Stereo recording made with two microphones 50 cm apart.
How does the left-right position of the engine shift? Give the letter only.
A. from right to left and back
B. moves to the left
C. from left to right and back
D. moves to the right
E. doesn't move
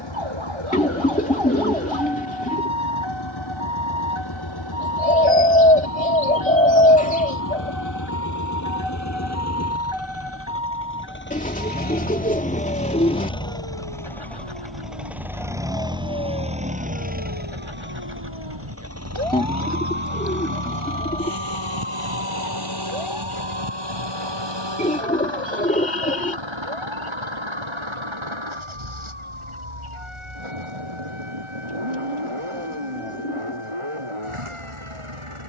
D.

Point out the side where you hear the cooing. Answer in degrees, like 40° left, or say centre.
10° left.